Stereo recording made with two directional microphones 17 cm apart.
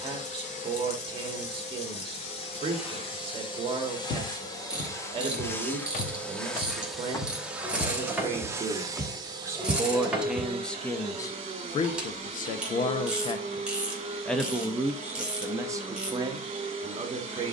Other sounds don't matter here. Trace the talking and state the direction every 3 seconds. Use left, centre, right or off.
right, right, right, centre, left, right.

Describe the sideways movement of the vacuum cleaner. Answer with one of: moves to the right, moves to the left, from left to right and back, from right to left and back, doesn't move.
moves to the right.